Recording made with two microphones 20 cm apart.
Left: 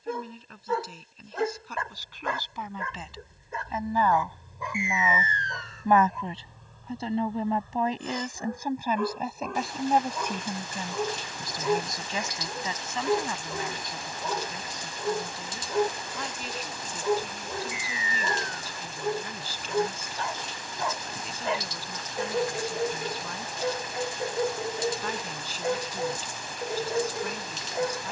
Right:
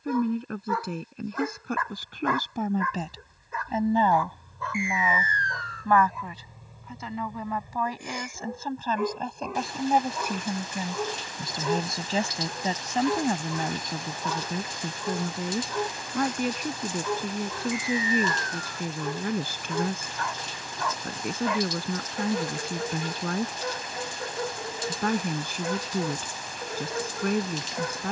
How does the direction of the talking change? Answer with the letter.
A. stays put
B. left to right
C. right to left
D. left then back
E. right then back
D.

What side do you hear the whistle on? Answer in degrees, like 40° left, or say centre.
20° left.